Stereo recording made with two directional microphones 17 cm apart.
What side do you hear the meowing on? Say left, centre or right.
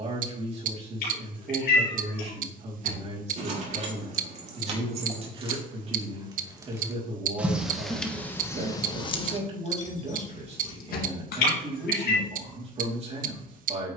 left.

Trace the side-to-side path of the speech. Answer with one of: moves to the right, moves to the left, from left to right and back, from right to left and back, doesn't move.
doesn't move.